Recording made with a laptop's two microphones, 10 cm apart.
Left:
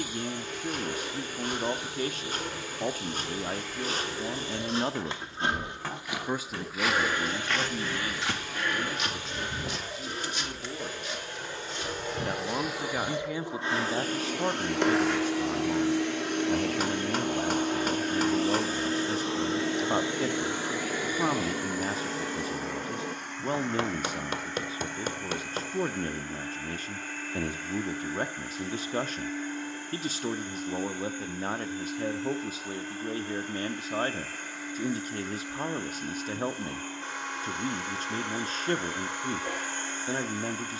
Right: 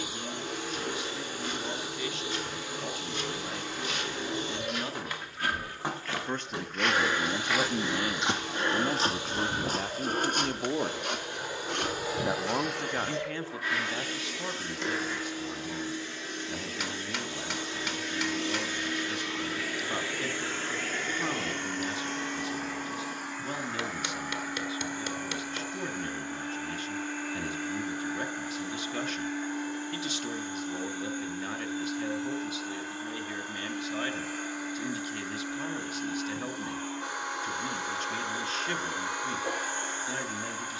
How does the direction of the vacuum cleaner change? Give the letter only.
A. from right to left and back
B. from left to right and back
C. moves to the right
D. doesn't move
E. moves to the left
A.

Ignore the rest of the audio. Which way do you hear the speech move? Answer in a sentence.
In this clip you hear the speech move from left to right and back again.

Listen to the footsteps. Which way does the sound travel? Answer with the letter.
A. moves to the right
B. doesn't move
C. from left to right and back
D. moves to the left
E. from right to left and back
A.